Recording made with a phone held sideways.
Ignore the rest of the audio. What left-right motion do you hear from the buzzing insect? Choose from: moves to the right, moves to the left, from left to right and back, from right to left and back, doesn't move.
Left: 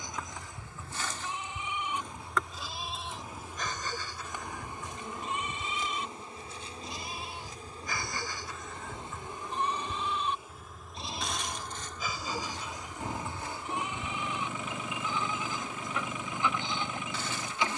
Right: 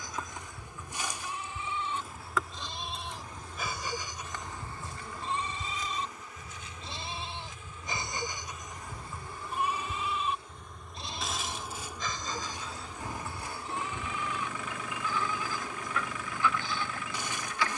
from right to left and back.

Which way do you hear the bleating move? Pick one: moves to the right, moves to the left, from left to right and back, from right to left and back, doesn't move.
from left to right and back.